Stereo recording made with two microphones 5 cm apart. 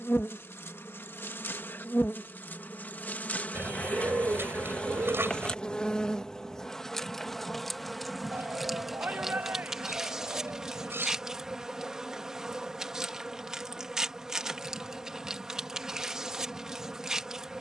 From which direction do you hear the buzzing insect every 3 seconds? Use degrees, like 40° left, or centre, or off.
50° left, 30° left, centre, 10° right, 10° right, 10° right.